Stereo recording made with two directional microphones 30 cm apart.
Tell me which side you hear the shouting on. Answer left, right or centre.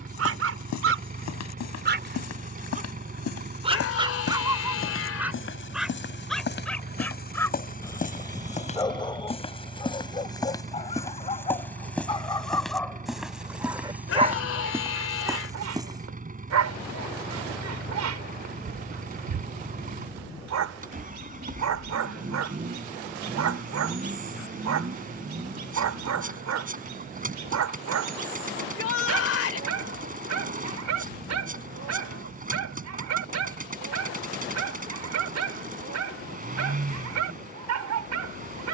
left.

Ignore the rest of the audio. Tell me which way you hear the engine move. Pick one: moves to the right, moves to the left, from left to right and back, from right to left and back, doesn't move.
doesn't move.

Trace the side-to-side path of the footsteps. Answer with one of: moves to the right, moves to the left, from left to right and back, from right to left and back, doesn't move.
moves to the right.